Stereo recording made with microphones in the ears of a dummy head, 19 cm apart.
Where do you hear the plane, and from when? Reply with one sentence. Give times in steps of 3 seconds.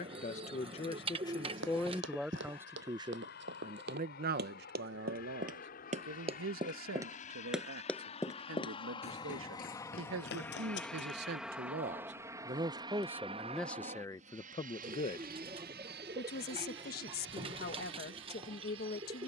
You can hear the plane on the left from 0 s, in the centre from 9 s and on the right from 12 s.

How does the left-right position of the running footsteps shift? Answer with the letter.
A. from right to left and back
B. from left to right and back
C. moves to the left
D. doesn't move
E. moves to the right
C.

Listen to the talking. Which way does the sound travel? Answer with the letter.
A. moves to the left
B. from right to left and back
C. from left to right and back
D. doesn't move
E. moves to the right
C.